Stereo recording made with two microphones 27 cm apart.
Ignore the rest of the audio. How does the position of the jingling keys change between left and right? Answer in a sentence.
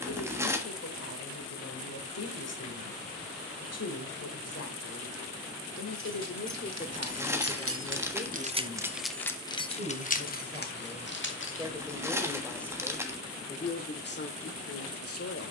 In this clip you hear the jingling keys move from right to left.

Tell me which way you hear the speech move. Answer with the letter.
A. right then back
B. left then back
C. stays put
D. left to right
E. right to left
A.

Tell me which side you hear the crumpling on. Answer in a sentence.
You can hear the crumpling in the centre.